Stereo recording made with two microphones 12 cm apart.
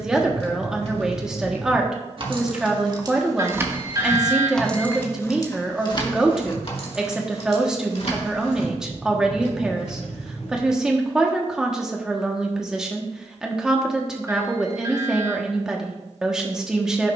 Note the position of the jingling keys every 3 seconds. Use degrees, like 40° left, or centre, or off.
50° right, 10° left, 60° left, 70° left, off, off.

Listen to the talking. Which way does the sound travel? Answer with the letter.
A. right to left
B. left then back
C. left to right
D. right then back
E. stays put
E.